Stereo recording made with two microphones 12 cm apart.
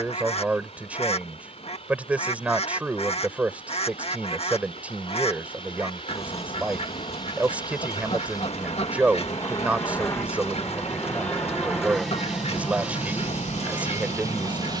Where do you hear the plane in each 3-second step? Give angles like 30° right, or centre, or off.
60° left, 50° left, 40° left, 20° left, 20° right.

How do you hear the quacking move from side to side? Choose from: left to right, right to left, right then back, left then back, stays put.
stays put.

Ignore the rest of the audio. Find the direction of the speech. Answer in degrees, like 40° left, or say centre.
10° right.